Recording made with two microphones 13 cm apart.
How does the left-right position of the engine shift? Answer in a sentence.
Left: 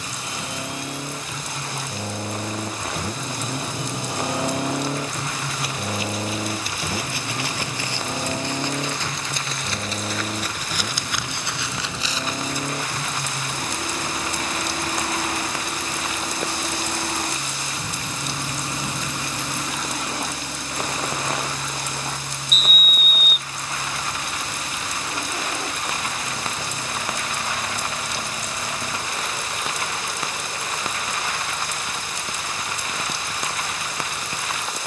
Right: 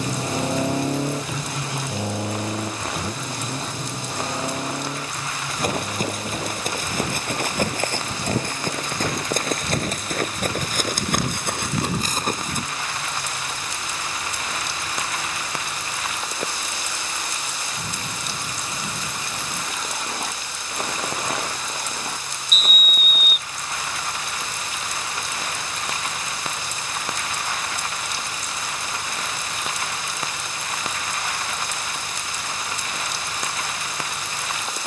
You can hear the engine move to the left.